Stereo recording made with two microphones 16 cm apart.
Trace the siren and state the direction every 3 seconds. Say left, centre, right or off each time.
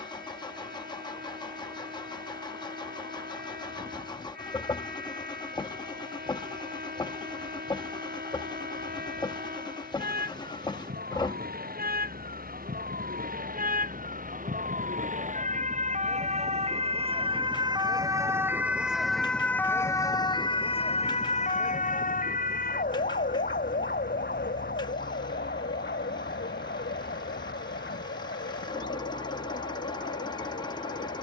right, right, right, right, right, right, centre, left, left, left, left.